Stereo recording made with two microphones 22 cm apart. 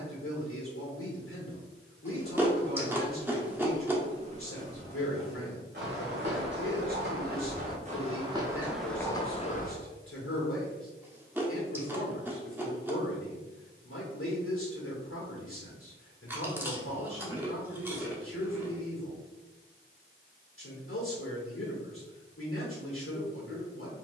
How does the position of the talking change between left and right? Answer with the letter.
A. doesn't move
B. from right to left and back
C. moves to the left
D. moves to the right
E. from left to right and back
A.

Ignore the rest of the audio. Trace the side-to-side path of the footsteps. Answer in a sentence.
In this clip you hear the footsteps go right and come back.